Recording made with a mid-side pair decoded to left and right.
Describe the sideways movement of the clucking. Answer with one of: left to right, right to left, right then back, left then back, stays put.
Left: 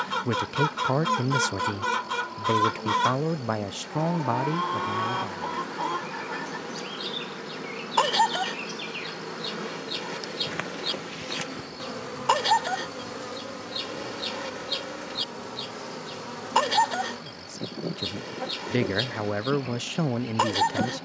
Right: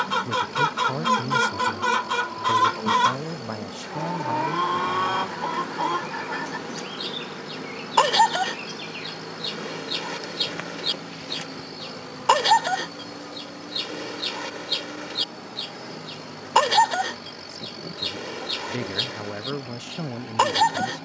stays put.